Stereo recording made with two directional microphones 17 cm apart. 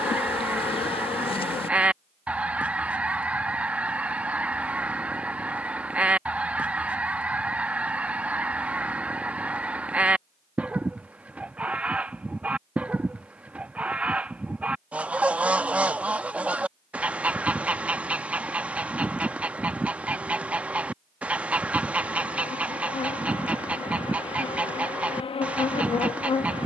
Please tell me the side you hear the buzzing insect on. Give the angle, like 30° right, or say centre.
30° left.